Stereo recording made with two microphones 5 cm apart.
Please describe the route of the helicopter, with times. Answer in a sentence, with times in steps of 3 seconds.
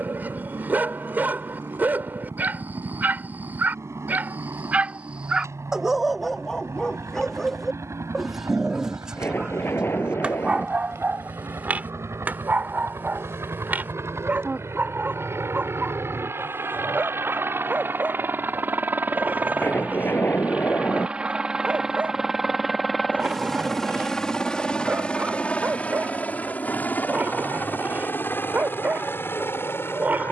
You can hear the helicopter on the right from 0 s, in the centre from 21 s and on the left from 24 s.